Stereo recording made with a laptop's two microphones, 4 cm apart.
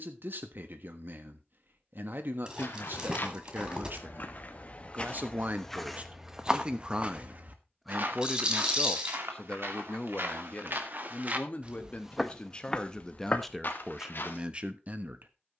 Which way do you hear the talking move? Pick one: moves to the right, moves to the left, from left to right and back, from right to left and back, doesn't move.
from right to left and back.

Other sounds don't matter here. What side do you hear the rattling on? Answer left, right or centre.
right.